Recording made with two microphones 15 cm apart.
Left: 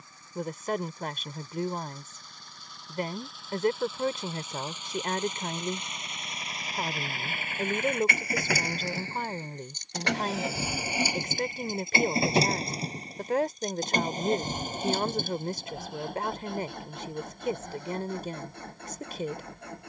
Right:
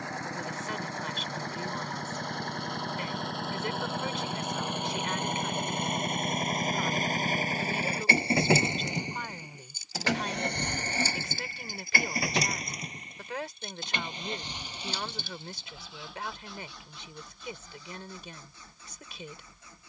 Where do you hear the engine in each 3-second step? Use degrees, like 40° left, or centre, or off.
70° right, 60° right, 40° right, 10° left, 40° left, 50° left, 60° left.